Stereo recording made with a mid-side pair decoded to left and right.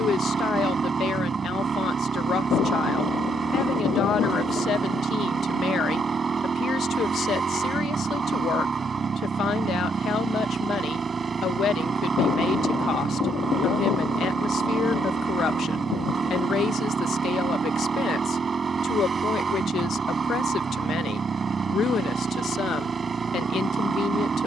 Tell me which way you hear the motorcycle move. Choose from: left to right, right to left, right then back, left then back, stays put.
stays put.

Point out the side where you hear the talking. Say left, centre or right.
left.